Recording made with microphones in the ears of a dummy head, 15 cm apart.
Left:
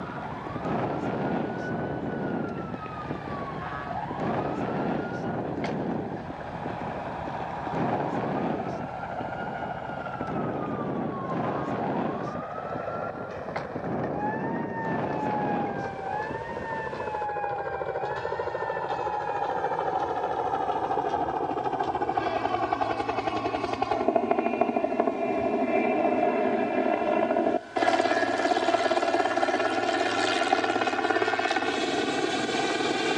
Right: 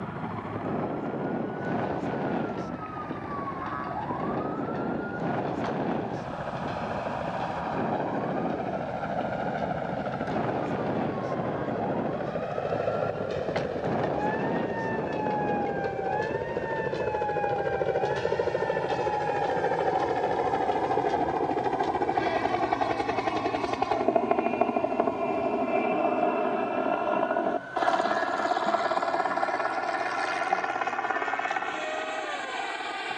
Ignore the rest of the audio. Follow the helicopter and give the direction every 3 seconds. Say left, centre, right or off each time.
right, right, right, right, right, right, right, centre, centre, left, left.